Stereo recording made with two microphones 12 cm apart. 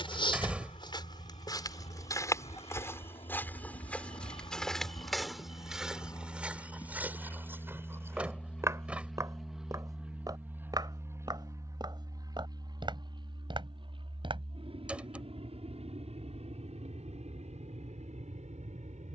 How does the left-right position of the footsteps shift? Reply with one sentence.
In this clip you hear the footsteps move to the right.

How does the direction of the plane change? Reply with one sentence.
In this clip you hear the plane move from left to right.